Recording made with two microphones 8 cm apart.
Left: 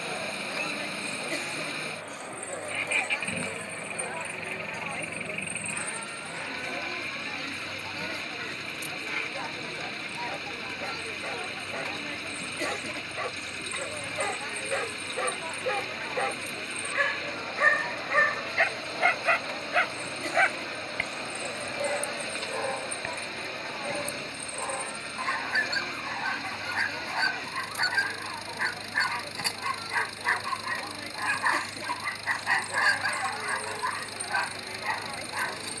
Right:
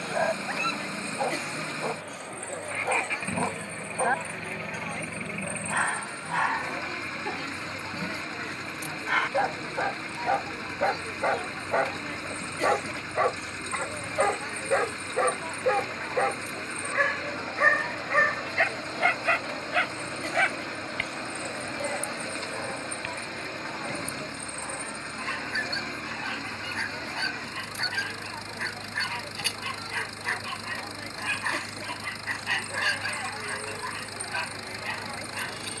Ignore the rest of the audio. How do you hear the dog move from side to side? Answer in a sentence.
You can hear the dog travel towards the left.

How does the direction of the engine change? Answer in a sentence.
In this clip you hear the engine stay in one place.